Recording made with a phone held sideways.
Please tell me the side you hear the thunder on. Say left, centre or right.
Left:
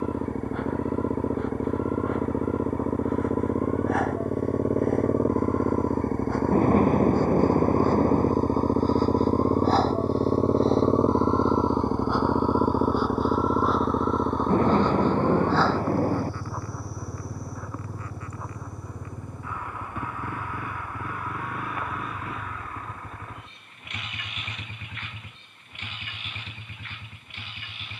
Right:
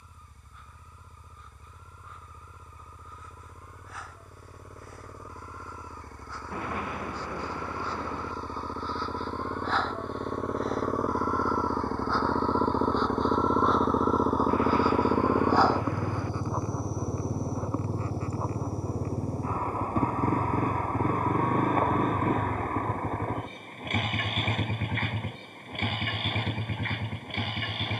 left.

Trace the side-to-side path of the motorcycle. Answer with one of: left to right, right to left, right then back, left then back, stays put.
left to right.